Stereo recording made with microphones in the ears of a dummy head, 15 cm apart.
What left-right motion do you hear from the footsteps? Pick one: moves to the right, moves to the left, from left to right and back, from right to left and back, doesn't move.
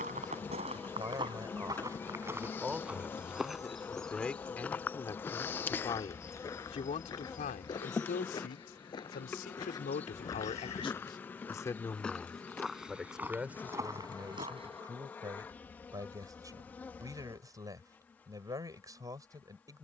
from right to left and back.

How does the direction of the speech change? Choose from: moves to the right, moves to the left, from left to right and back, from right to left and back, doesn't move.
from right to left and back.